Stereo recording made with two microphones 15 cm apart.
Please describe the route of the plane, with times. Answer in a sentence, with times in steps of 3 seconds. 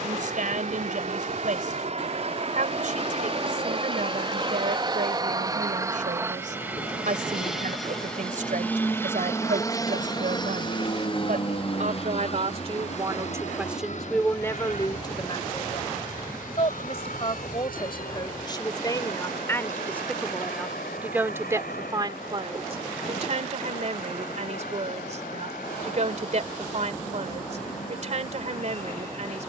In this clip you hear the plane on the right from 0 s, in the centre from 6 s and on the left from 9 s.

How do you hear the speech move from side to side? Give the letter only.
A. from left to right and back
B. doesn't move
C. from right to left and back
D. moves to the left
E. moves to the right
C.